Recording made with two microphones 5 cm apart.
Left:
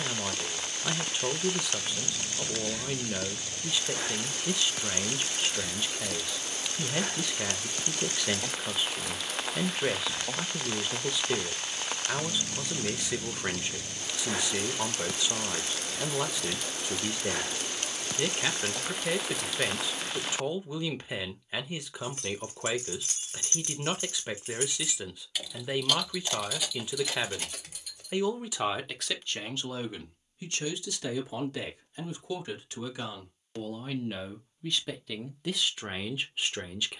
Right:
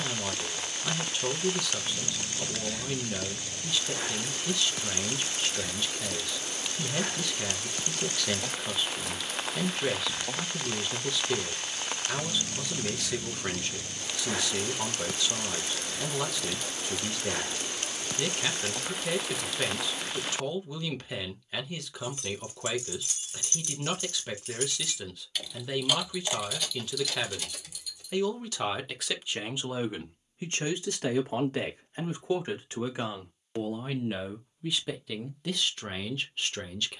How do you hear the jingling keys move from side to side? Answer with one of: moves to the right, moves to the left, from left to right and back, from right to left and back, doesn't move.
from left to right and back.